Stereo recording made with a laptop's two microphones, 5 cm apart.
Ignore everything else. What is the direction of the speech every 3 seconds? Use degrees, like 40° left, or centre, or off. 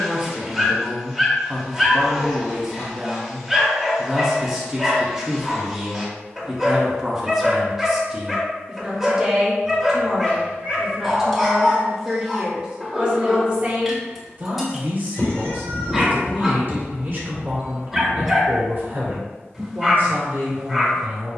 10° right, 10° right, 10° right, 10° right, 30° right, 40° right, 50° right.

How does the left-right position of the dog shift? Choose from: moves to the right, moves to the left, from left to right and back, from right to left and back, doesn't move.
doesn't move.